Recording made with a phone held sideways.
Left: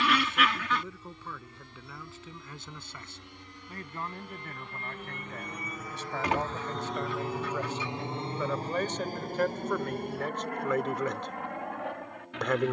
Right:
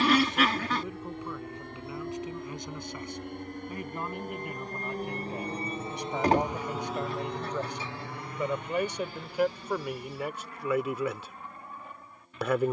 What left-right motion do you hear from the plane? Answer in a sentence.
You can hear the plane move from right to left.